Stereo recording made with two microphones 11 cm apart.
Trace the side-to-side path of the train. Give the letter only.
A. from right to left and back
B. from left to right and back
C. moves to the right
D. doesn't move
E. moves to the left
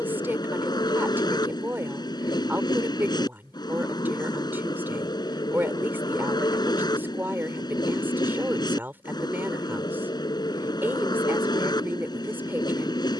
D.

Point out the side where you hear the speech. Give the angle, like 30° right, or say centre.
20° right.